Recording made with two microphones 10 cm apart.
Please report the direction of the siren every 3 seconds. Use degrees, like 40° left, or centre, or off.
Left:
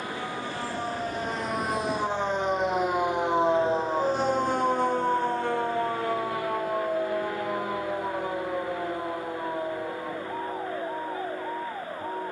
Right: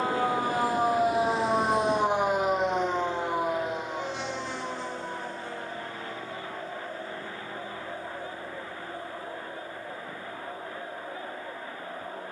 30° right, 40° left, 70° left, 80° left.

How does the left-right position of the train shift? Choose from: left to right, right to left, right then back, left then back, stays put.
right to left.